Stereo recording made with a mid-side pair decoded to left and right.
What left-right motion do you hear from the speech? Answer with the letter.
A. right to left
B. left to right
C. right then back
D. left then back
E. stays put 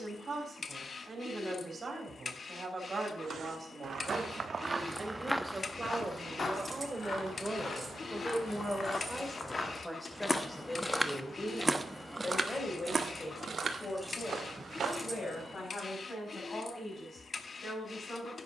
A.